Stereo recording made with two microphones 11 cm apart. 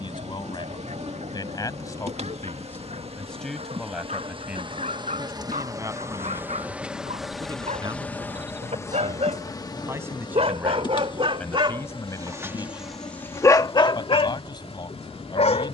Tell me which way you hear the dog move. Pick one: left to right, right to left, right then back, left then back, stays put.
right to left.